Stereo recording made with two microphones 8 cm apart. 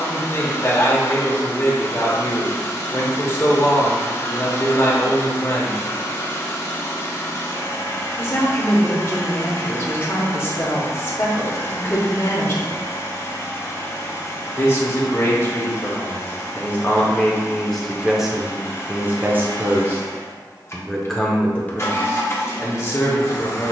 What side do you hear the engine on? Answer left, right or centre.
left.